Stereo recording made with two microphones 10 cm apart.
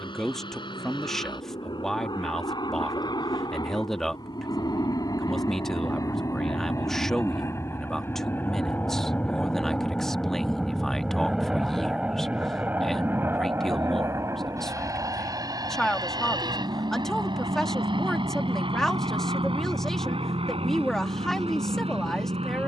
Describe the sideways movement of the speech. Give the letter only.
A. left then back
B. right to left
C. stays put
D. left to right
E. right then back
C.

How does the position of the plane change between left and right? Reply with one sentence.
In this clip you hear the plane move to the right.